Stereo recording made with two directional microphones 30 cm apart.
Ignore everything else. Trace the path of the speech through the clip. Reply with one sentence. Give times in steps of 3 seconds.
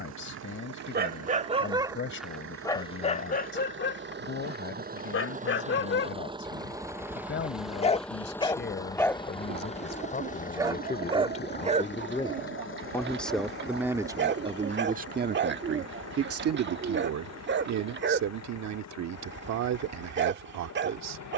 You can hear the speech on the left from 0 s, in the centre from 12 s and on the right from 15 s.